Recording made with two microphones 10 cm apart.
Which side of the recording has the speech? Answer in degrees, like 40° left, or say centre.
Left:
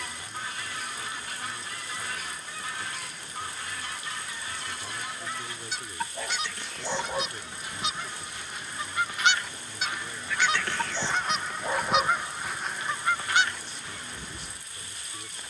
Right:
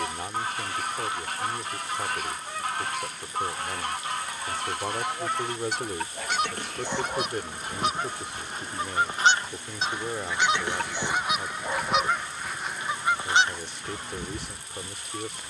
70° right.